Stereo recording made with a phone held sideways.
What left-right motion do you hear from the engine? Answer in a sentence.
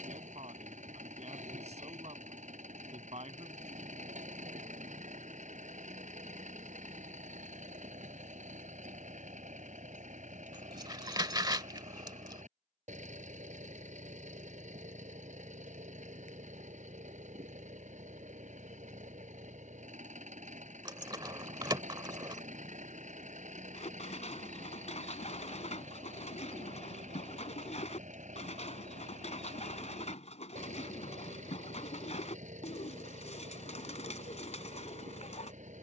In this clip you hear the engine stay put.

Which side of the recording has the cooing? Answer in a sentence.
In this clip you hear the cooing on the left.